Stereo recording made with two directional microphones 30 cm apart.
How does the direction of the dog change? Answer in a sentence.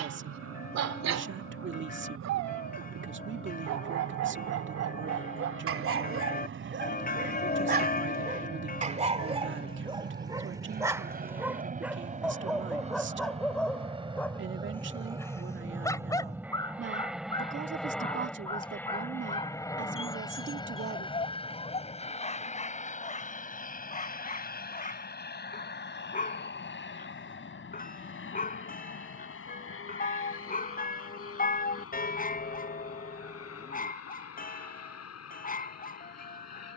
You can hear the dog travel towards the left.